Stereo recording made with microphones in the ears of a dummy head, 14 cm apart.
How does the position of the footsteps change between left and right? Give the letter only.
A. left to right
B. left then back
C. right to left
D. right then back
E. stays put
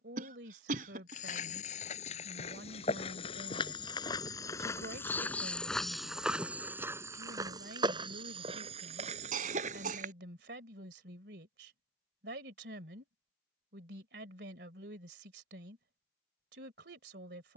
A.